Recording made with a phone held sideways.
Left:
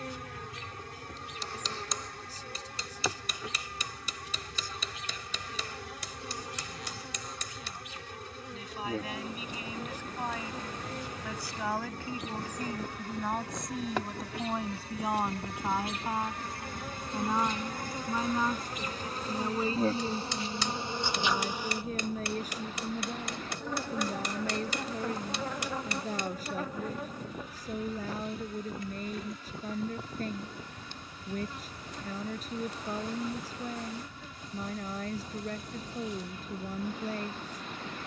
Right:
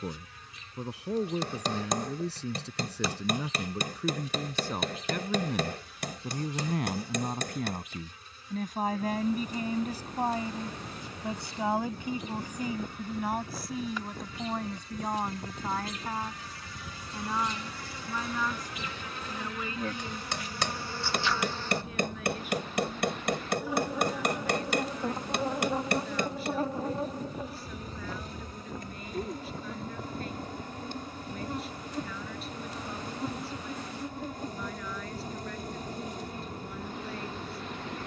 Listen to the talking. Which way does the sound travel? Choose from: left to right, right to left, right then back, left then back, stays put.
right to left.